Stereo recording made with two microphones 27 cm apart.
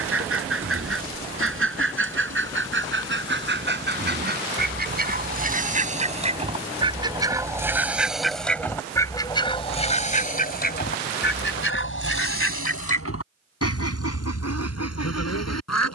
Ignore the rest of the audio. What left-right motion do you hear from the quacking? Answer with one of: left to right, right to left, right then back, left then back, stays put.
right to left.